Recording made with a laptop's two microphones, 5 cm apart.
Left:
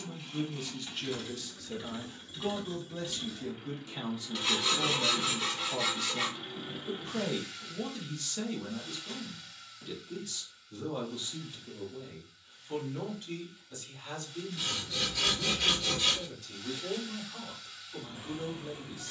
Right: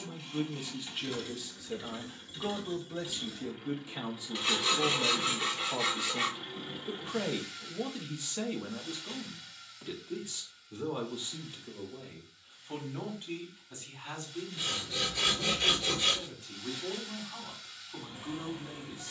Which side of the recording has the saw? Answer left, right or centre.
centre.